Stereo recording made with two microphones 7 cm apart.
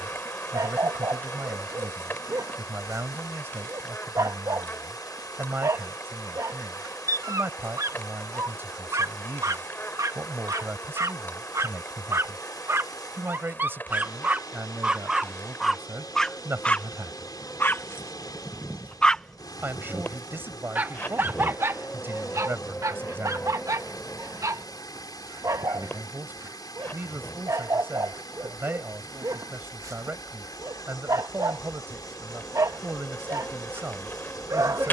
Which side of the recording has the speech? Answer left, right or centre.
right.